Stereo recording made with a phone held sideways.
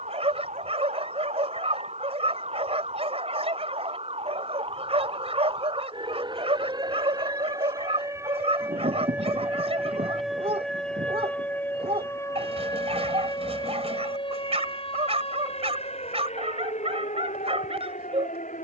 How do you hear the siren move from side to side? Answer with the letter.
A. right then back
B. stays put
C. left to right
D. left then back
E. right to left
E.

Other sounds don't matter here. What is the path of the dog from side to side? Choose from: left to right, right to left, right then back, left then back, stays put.
stays put.